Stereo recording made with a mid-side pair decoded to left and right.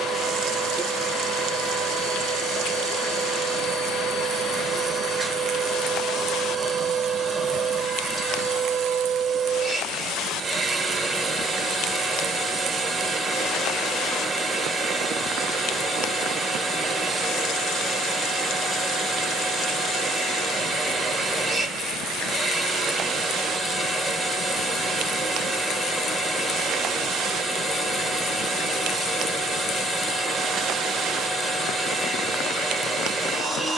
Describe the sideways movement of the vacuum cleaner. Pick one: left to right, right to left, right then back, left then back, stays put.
stays put.